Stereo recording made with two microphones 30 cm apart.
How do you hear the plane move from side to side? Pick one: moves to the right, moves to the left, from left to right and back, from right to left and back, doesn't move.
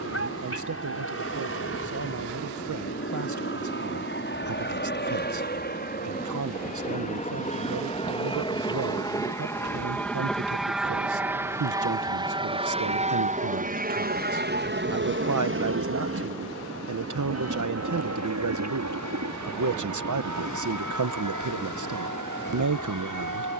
moves to the right.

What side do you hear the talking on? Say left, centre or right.
right.